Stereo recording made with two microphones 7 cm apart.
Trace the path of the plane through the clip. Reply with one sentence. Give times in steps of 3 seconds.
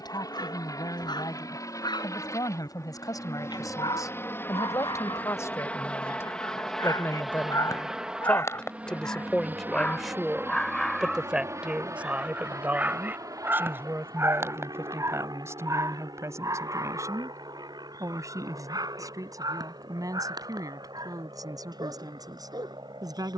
In this clip you hear the plane on the left from 0 s, in the centre from 6 s and on the right from 9 s.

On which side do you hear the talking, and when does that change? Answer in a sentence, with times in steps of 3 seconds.
In this clip you hear the talking on the left from 0 s, in the centre from 9 s and on the right from 12 s.